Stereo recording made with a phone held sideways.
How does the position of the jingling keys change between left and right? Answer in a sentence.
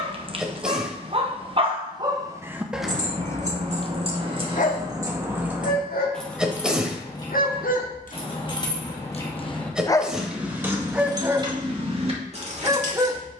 In this clip you hear the jingling keys move from right to left and back again.